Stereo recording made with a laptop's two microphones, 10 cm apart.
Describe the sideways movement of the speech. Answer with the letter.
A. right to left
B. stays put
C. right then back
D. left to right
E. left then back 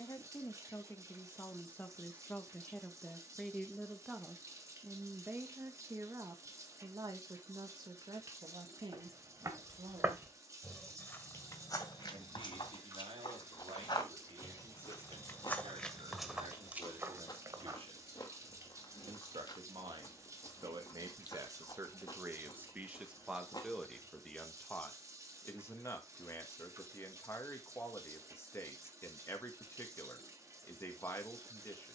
C.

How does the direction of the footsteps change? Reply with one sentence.
In this clip you hear the footsteps go left and come back.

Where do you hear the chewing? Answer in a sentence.
In this clip you hear the chewing on the left.